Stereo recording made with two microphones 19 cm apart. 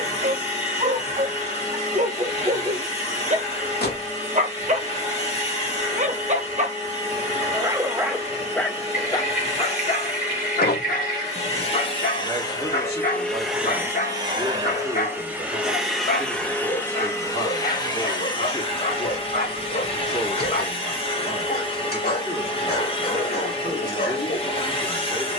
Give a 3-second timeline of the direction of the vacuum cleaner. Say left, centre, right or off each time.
left, left, left, left, centre, centre, left, left, left.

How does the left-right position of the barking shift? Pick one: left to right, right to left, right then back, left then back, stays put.
right to left.